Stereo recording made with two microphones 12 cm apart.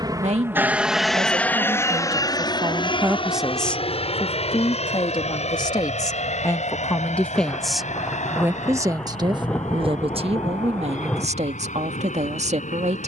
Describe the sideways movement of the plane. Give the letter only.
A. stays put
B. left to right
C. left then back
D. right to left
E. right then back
D.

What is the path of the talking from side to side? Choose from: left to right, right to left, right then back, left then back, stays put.
left then back.